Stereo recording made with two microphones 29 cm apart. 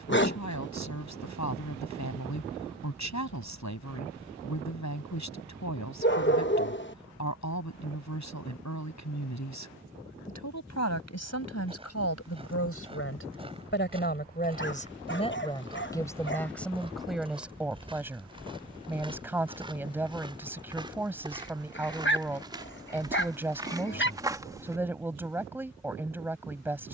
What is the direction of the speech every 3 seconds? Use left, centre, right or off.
left, left, left, left, left, centre, centre, centre, centre.